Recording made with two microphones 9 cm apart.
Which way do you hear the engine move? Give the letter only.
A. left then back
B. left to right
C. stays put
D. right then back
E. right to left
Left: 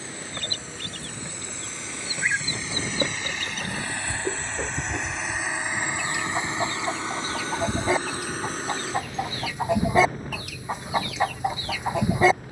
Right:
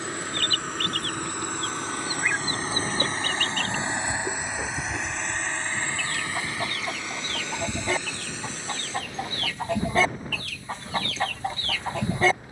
E.